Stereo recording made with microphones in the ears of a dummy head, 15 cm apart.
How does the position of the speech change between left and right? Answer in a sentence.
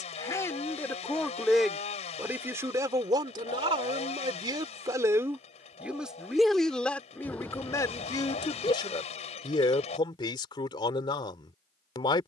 In this clip you hear the speech go right and come back.